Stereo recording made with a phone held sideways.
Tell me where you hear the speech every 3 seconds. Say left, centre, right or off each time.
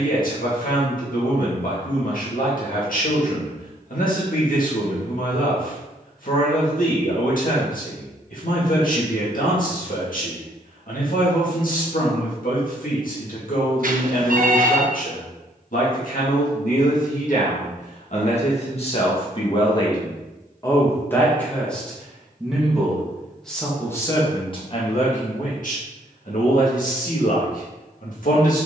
left, left, left, left, left, left, left, centre, left, left.